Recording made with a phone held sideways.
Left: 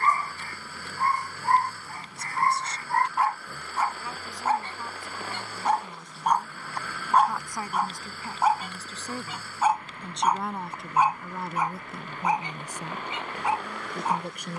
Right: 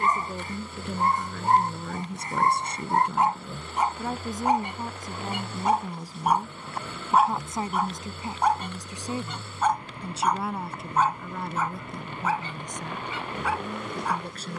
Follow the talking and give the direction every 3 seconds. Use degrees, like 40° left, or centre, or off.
60° right, 40° right, 20° right, centre, 10° left.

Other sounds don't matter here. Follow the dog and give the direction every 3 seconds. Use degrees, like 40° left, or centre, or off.
20° right, 20° right, centre, 10° left, 20° left.